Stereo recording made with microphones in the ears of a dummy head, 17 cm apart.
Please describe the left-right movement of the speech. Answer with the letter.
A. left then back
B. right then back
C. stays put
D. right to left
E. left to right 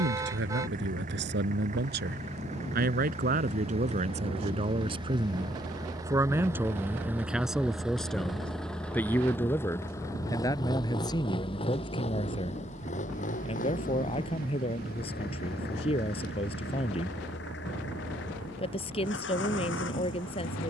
D.